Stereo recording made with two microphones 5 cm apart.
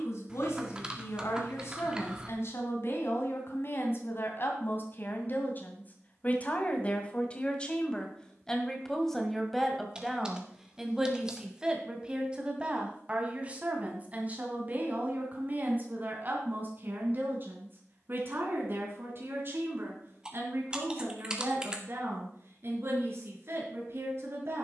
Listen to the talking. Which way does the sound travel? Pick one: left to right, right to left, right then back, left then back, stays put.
left to right.